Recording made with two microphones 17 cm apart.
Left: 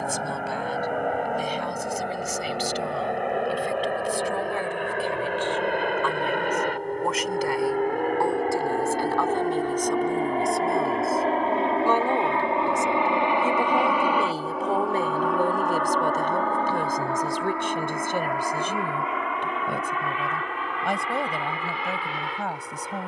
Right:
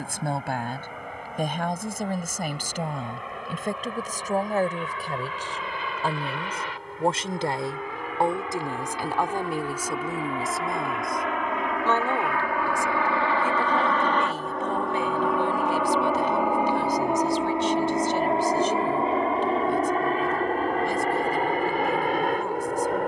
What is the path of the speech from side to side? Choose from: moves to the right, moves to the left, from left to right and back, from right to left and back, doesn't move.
moves to the left.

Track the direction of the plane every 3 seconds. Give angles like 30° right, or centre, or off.
70° left, 60° left, 50° left, 40° left, 20° left, 10° right, 30° right, 40° right.